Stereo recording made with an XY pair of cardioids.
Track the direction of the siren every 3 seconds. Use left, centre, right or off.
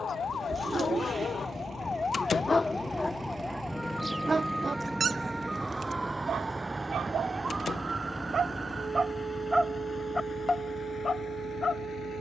left, centre, right, right.